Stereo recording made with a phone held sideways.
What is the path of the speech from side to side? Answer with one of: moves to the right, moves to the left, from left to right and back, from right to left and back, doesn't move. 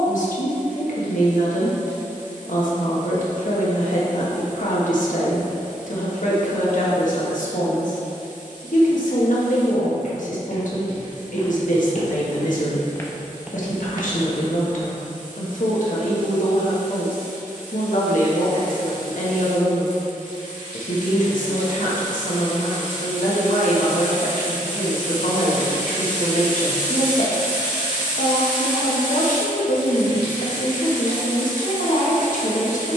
doesn't move.